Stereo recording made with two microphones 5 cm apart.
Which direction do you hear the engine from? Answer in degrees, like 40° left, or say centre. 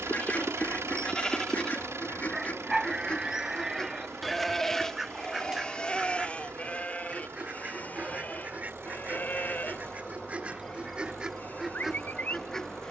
70° right.